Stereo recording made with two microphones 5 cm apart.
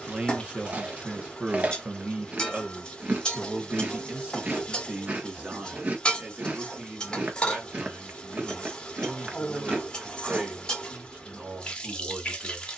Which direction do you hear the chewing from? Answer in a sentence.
In this clip you hear the chewing on the right.